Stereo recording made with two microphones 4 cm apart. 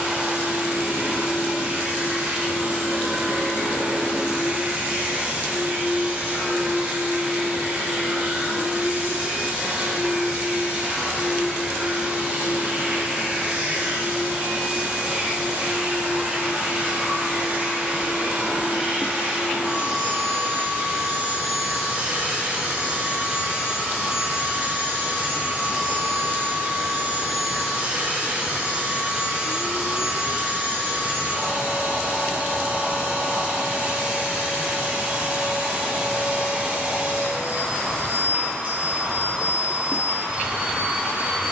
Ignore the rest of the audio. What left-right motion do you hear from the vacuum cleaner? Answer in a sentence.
You can hear the vacuum cleaner stay in one place.